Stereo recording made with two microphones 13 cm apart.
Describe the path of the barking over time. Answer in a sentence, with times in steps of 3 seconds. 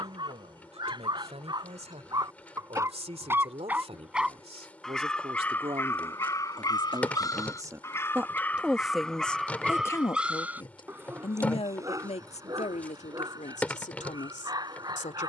You can hear the barking on the right from 0 s, in the centre from 3 s, on the left from 6 s, in the centre from 9 s and on the right from 12 s.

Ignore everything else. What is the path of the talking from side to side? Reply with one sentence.
In this clip you hear the talking travel towards the left.